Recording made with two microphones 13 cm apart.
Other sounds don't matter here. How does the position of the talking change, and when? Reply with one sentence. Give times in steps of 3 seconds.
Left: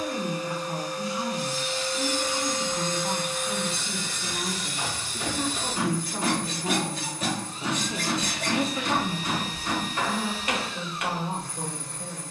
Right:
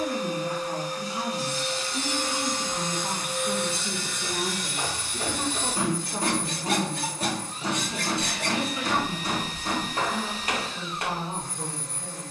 You can hear the talking on the right from 0 s, in the centre from 6 s and on the left from 9 s.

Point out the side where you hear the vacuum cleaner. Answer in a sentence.
In this clip you hear the vacuum cleaner on the right.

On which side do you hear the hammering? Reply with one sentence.
You can hear the hammering on the right.